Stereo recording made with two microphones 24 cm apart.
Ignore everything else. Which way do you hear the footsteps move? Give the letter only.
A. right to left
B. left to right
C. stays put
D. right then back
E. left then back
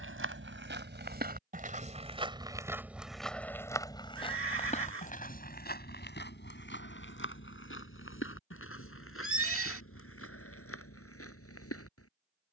A.